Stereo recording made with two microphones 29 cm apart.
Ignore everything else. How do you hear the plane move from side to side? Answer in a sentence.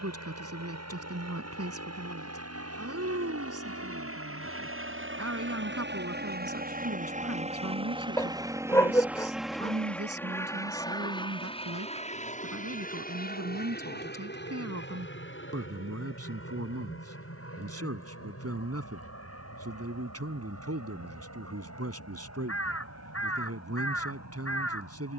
You can hear the plane move to the left.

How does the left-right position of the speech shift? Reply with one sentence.
In this clip you hear the speech stay put.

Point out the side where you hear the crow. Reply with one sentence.
You can hear the crow on the left.